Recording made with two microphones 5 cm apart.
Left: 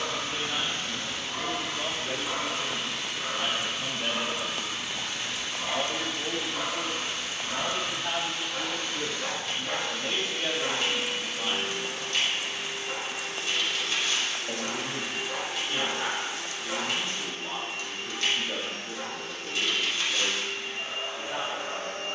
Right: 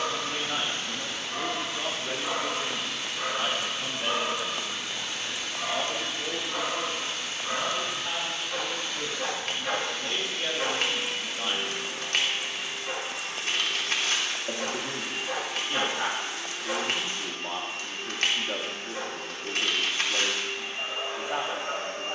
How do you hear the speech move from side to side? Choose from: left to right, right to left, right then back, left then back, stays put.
left then back.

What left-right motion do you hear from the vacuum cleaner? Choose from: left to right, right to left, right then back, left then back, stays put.
left to right.